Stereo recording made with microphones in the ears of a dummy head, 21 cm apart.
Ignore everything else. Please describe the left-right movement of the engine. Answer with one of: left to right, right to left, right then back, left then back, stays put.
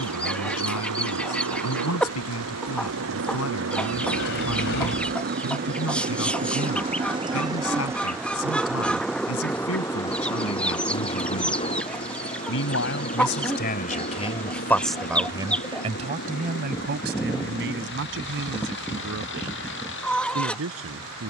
right to left.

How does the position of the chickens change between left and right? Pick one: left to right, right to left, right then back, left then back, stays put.
stays put.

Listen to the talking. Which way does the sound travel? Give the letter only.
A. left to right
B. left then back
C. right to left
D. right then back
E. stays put
A.